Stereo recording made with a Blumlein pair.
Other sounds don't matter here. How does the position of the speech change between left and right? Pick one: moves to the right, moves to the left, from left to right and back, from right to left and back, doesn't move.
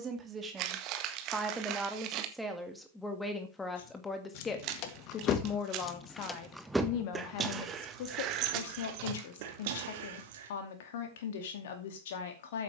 moves to the left.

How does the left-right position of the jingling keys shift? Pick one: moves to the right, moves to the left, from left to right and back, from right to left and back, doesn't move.
moves to the right.